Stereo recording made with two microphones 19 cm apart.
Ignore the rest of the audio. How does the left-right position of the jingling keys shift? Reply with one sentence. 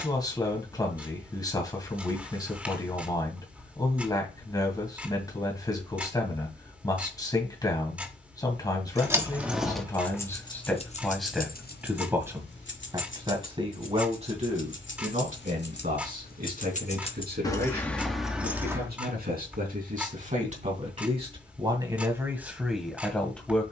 You can hear the jingling keys move from right to left and back again.